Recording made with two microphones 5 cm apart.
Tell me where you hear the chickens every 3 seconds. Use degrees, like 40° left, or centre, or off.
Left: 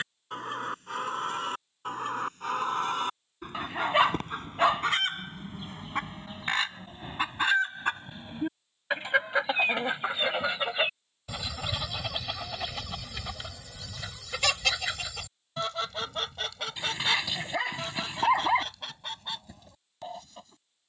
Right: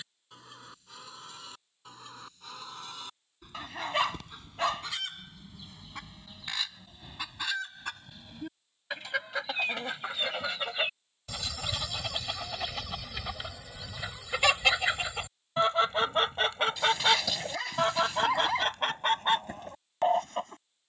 60° left, 50° left, 40° left, 20° left, 10° right, 30° right, 50° right.